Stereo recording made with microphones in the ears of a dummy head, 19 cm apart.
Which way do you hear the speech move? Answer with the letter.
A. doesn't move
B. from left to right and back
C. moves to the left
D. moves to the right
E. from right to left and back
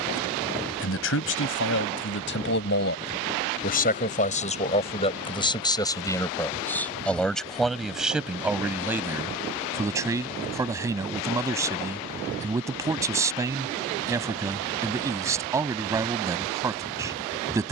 D.